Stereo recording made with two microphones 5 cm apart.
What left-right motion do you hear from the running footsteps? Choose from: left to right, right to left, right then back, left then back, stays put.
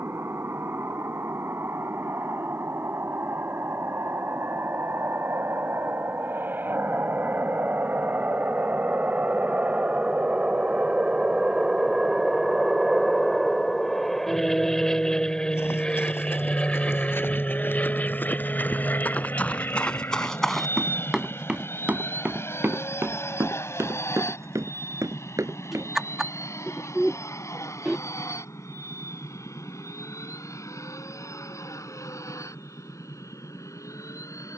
left to right.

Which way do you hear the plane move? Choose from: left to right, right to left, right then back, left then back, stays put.
right to left.